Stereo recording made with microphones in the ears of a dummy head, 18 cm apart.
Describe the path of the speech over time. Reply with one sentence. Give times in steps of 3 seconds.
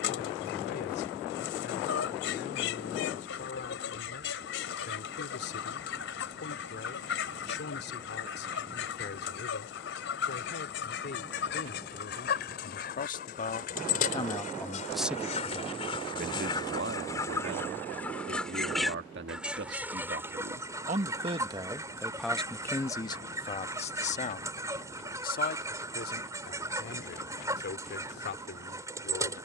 You can hear the speech on the left from 0 s, on the right from 15 s, in the centre from 21 s and on the left from 24 s.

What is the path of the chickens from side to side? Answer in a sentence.
In this clip you hear the chickens move from left to right.